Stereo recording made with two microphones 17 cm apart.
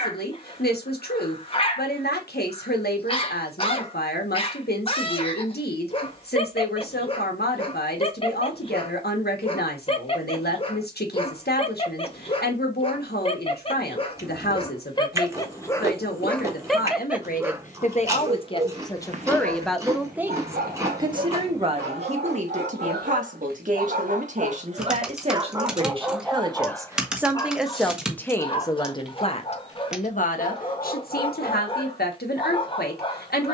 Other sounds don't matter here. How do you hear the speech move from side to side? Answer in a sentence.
In this clip you hear the speech move from left to right and back again.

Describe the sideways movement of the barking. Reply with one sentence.
In this clip you hear the barking move from left to right and back again.